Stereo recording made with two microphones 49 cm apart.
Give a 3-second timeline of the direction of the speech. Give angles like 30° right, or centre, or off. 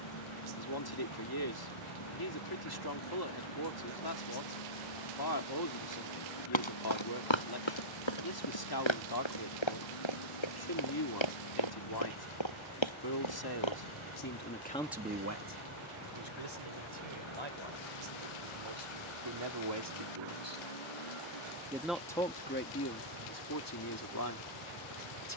50° left, 50° left, 50° left, 50° left, 40° left, 60° right, 60° right, 20° left, 40° left.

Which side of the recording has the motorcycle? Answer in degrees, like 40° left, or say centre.
90° left.